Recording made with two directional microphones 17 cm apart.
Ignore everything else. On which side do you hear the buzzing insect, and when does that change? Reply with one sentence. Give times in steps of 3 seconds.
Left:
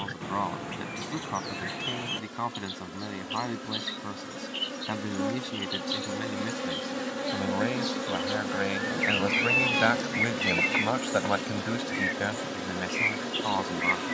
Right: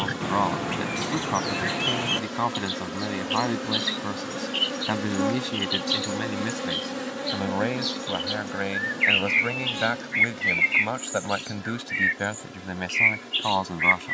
You can hear the buzzing insect on the right from 0 s, in the centre from 6 s and on the left from 9 s.